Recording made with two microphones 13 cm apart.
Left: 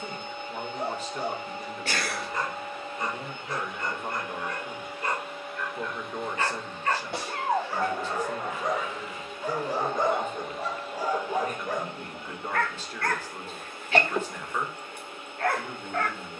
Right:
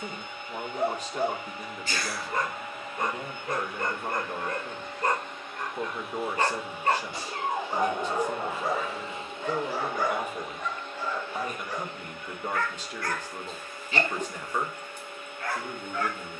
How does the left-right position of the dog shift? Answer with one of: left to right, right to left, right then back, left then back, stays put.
right to left.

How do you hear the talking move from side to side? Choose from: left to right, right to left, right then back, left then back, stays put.
stays put.